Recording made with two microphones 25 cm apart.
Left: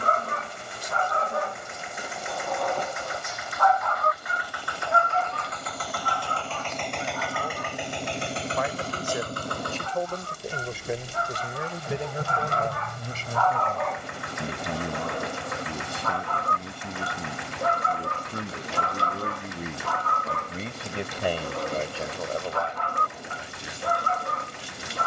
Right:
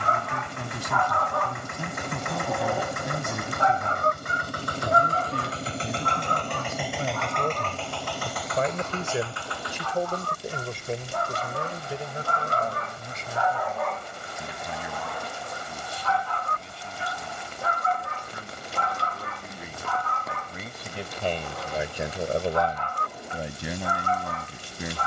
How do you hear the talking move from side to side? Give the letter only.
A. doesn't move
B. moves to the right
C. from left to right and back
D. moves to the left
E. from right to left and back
E.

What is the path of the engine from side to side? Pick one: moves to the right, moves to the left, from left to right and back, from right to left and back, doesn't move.
moves to the left.